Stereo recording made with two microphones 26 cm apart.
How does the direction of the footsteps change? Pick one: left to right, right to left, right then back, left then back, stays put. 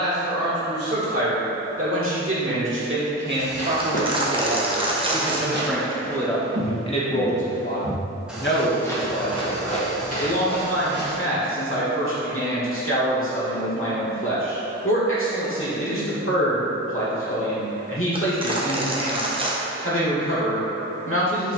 right then back.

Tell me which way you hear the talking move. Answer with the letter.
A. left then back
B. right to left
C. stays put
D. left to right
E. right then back
B.